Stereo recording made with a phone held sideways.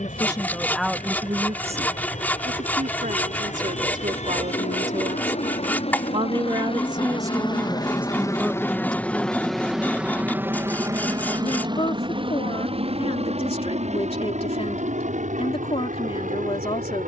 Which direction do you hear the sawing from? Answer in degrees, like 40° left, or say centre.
10° left.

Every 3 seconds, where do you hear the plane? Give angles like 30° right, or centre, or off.
70° left, 60° left, 30° left, 10° right, 50° right, 60° right.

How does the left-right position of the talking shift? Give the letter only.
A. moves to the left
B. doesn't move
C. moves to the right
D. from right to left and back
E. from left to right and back
E.